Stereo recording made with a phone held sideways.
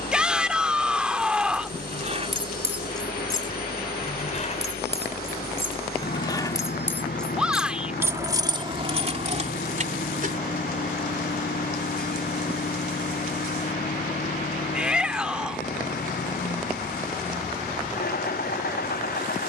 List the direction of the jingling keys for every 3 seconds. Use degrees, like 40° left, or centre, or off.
40° right, 40° left, centre, 50° right, off, off, off.